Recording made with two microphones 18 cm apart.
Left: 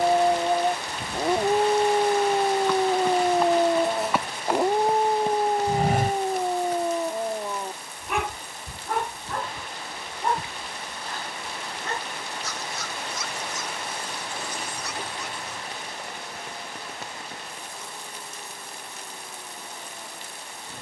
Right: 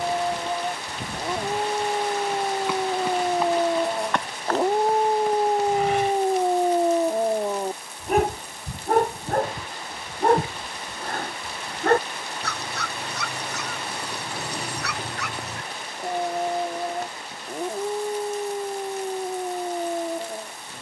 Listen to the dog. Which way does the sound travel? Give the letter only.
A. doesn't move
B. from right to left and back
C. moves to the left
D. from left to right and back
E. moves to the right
E.